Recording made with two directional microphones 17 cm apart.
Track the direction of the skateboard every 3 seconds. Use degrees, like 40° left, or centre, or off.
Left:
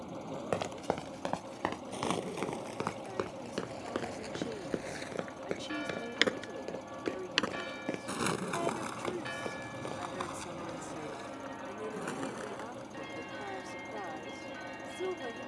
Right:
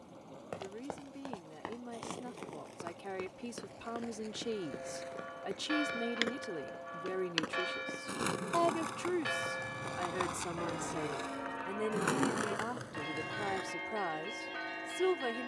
50° left, 50° left, 20° left, 20° right, 60° right.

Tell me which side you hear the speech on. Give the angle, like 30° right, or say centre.
40° right.